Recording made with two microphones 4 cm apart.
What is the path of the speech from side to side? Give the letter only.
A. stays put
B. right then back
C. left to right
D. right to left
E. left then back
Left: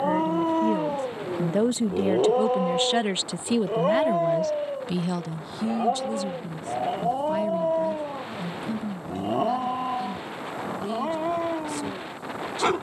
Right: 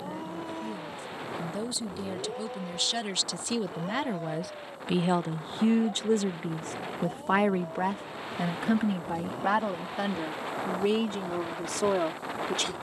C.